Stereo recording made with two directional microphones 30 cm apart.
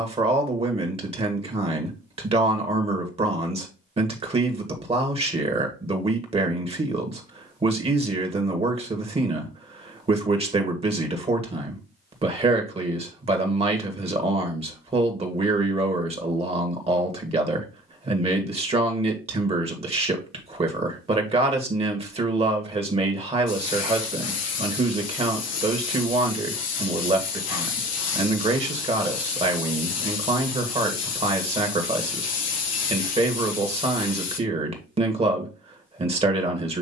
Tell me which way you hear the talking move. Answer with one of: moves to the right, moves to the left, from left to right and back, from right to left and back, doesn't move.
doesn't move.